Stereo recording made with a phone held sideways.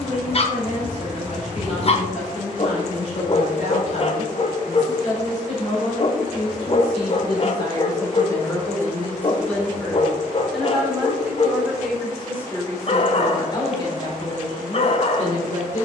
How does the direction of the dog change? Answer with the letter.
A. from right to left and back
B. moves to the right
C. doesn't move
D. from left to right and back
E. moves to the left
C.